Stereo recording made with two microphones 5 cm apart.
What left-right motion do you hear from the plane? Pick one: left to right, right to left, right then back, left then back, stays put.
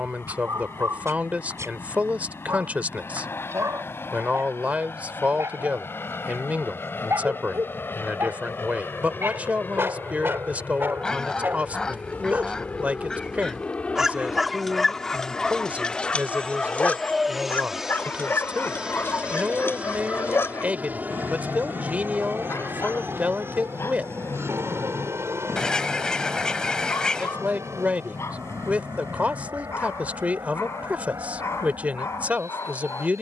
left to right.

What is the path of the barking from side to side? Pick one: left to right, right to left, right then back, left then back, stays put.
right to left.